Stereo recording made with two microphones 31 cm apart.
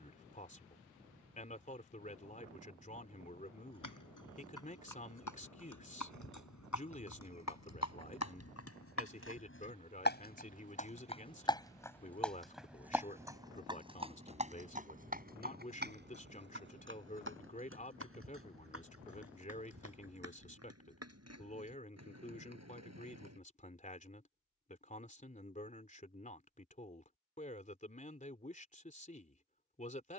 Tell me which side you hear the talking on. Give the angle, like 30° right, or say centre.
20° left.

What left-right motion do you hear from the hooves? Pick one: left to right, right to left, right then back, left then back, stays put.
left to right.